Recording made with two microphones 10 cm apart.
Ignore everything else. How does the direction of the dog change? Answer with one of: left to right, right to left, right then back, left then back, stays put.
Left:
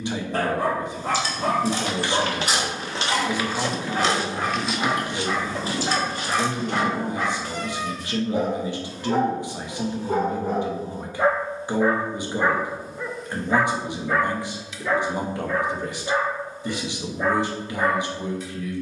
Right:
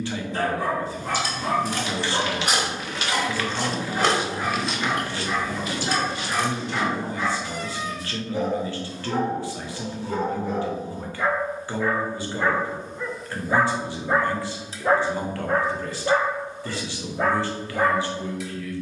left to right.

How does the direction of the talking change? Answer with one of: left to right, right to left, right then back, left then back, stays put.
stays put.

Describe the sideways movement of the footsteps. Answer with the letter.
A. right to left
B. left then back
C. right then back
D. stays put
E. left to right
C.